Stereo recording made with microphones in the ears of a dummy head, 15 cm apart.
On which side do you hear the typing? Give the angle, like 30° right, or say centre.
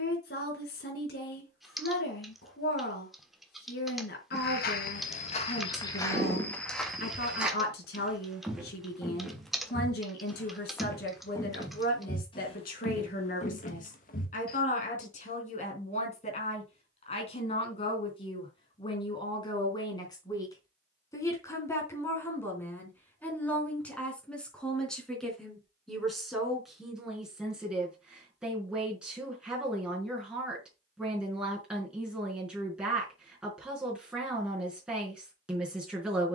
centre.